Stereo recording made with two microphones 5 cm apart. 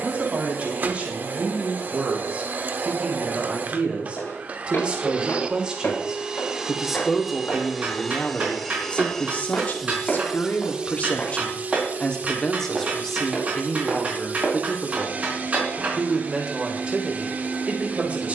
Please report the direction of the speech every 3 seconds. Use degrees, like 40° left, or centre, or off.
30° right, 30° right, centre, 30° left, centre, 30° right.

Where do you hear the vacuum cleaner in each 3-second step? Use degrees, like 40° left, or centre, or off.
40° right, 30° right, 10° right, 20° right, 40° right, 40° right.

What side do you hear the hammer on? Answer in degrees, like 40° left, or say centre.
30° right.